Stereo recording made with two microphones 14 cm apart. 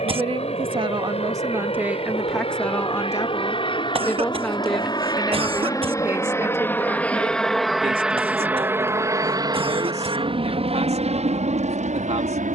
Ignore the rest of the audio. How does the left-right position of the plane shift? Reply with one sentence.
You can hear the plane go from the left side to the right.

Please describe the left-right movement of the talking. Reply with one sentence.
In this clip you hear the talking go left and come back.